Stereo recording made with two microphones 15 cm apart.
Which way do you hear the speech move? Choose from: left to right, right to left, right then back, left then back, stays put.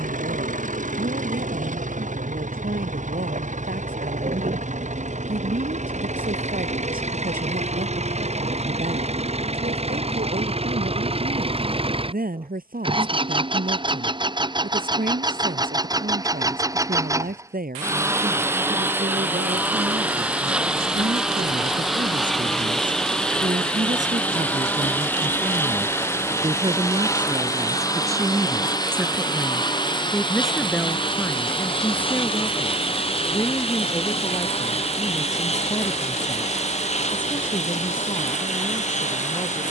right to left.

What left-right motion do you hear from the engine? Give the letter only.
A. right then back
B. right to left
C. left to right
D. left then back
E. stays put
B.